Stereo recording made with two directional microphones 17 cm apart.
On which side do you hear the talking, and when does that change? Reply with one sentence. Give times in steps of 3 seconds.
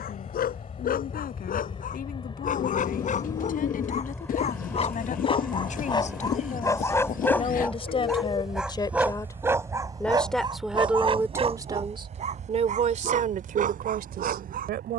You can hear the talking on the left from 0 s, in the centre from 9 s and on the right from 12 s.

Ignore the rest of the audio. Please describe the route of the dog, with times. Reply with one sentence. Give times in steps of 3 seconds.
You can hear the dog on the left from 0 s, in the centre from 6 s and on the right from 9 s.